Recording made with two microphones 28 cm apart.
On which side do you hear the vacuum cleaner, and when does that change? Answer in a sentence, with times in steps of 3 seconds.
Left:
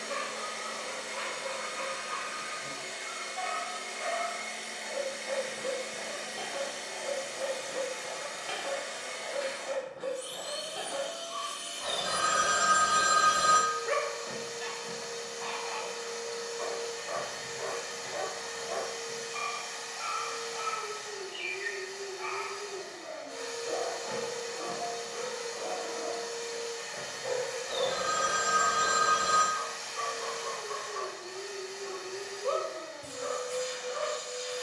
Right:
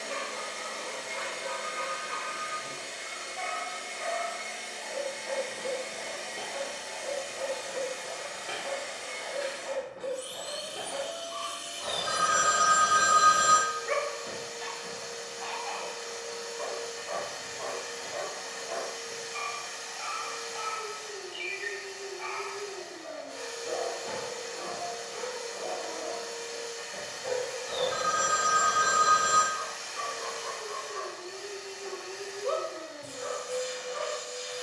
In this clip you hear the vacuum cleaner on the right from 0 s, in the centre from 3 s and on the right from 9 s.